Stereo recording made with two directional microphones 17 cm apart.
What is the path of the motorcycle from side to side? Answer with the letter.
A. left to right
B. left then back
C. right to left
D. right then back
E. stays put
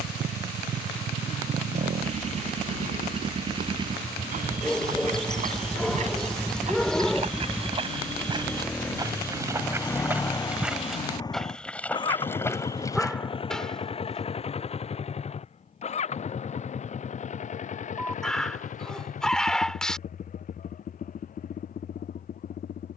C.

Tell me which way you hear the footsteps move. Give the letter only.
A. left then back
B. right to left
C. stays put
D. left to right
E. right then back
B.